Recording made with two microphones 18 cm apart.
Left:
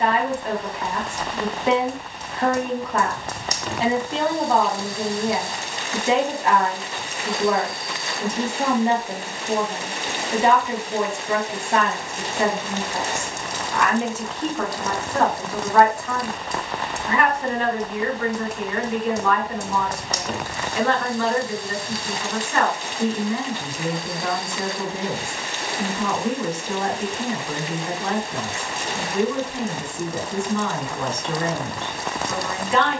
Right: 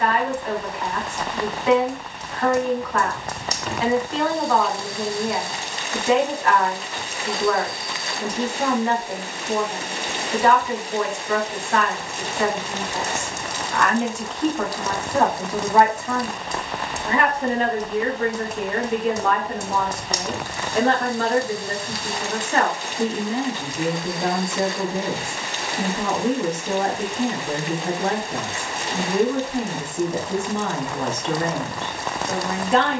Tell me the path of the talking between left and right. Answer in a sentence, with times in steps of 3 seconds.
You can hear the talking on the left from 0 s, in the centre from 12 s and on the right from 15 s.